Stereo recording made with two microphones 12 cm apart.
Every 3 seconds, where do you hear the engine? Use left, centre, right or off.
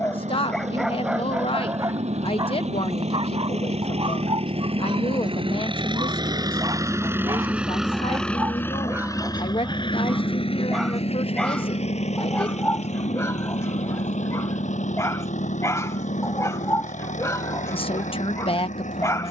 right, right, centre, left, left, left, left.